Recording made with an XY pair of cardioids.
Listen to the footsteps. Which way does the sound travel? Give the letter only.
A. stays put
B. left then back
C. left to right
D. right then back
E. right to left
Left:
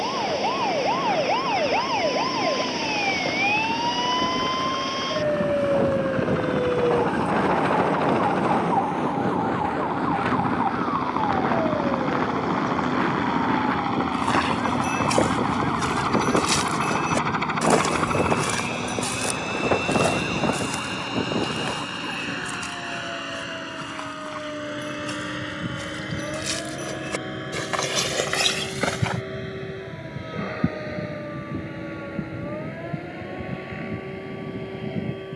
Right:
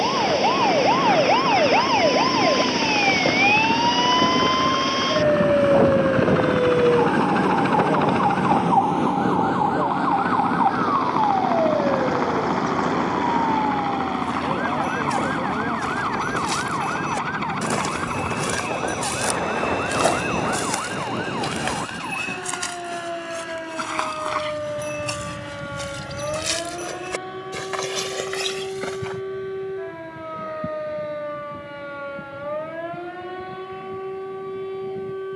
D.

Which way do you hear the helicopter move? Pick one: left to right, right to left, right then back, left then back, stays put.
right to left.